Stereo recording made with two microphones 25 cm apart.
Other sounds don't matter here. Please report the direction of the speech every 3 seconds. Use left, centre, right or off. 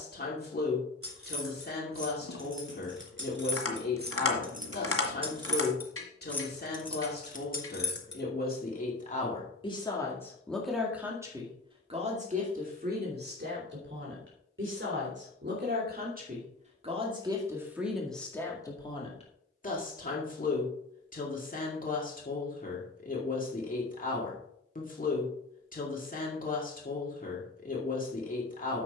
left, left, left, centre, right, right, left, left, left, left.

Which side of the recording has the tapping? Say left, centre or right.
left.